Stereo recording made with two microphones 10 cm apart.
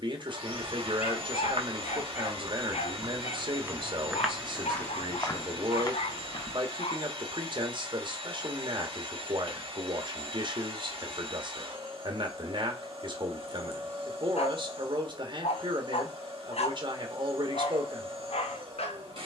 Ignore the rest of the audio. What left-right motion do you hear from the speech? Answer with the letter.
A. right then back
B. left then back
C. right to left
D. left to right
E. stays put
E.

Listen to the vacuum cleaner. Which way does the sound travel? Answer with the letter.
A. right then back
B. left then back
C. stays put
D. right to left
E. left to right
C.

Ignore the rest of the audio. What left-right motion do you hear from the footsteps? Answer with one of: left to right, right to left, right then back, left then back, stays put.
right to left.